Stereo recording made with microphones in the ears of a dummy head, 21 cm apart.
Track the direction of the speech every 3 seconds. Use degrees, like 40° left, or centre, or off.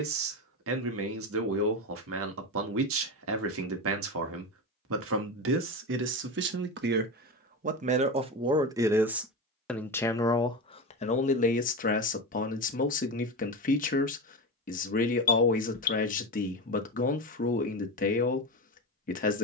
60° right, 60° right, 30° right, 20° left, 40° left, 40° left, 40° left.